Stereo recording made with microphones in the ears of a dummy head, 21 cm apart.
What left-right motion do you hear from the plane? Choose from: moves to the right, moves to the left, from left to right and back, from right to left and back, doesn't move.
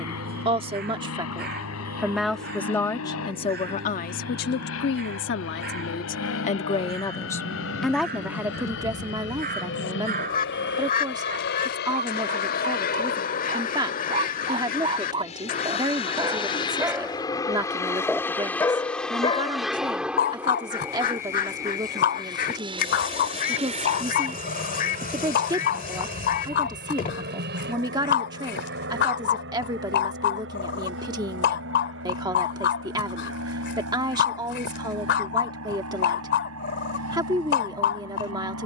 moves to the right.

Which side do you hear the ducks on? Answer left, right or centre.
left.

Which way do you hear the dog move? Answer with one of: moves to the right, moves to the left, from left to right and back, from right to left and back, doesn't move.
moves to the left.